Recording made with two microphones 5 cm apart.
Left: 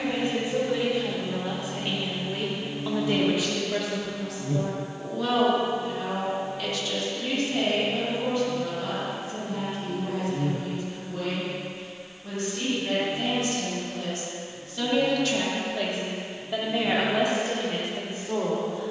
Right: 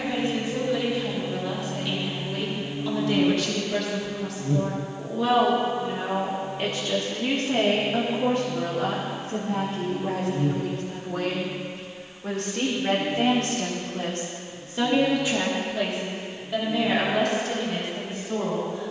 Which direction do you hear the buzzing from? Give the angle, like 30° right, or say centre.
10° right.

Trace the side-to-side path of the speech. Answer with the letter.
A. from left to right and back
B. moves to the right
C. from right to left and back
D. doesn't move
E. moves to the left
A.